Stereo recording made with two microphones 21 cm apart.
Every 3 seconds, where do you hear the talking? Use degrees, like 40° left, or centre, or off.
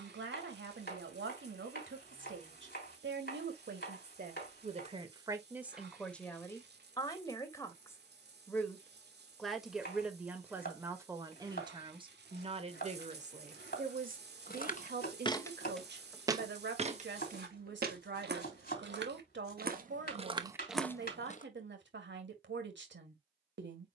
60° right, 40° right, 10° left, 10° right, 40° right, 60° right, 60° right, 60° right.